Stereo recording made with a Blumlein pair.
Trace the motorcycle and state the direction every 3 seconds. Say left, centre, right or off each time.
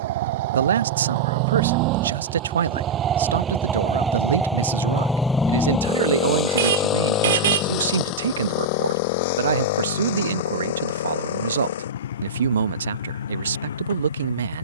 right, centre, left, left, left.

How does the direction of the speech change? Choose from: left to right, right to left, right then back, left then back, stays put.
stays put.